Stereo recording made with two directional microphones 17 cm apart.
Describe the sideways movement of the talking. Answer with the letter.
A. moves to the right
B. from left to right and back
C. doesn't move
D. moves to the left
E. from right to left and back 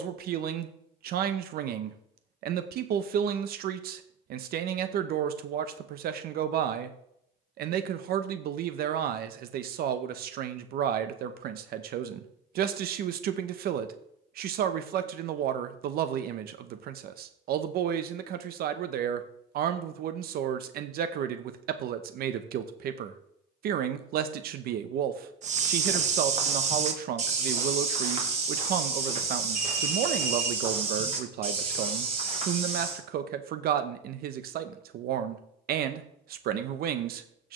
C.